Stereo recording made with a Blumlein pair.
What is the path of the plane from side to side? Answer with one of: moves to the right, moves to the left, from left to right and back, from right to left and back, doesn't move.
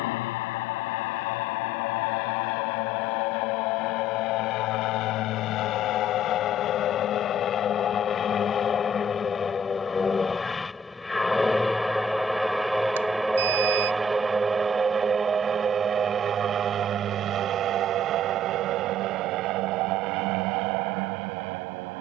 moves to the right.